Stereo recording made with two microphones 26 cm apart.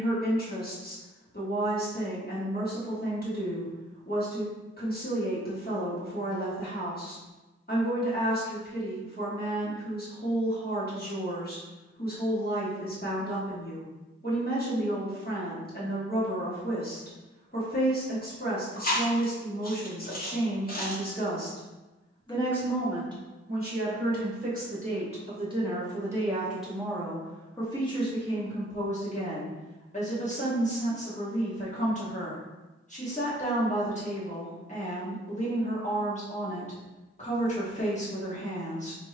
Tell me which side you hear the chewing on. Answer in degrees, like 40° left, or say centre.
40° left.